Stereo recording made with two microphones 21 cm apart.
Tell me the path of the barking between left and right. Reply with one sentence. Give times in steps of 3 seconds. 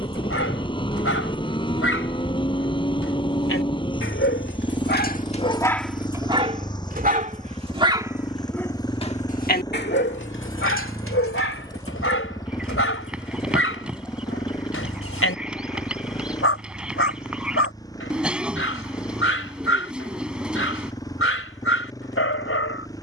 You can hear the barking on the left from 0 s, on the right from 6 s and on the left from 9 s.